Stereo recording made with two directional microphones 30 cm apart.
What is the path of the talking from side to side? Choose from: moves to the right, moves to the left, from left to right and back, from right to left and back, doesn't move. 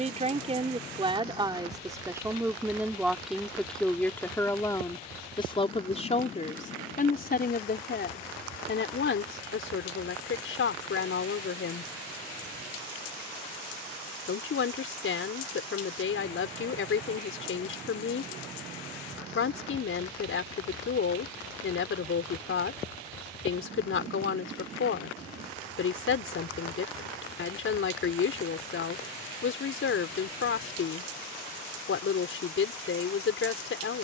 moves to the left.